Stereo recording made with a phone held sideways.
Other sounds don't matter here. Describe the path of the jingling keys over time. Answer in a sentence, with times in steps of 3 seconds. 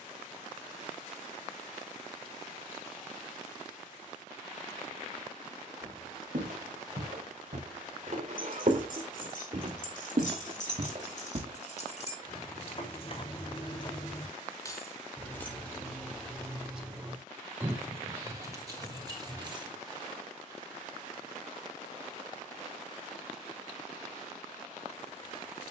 You can hear the jingling keys not at all from 0 s, on the left from 6 s, in the centre from 15 s, on the right from 18 s and not at all from 21 s.